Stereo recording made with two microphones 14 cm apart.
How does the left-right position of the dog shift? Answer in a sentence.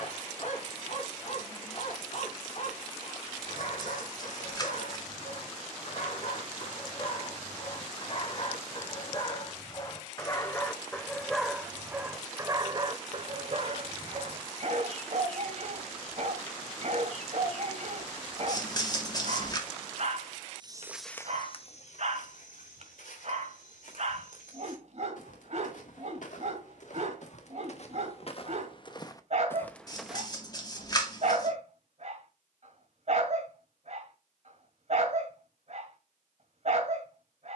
In this clip you hear the dog move to the right.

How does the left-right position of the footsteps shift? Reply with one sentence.
In this clip you hear the footsteps move from right to left and back again.